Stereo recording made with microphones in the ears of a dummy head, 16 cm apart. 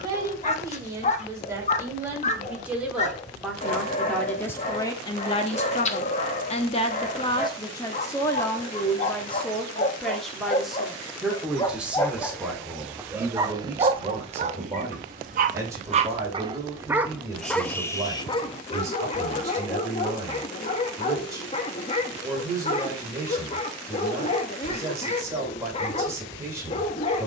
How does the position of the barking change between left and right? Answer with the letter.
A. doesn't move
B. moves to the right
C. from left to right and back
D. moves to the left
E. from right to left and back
C.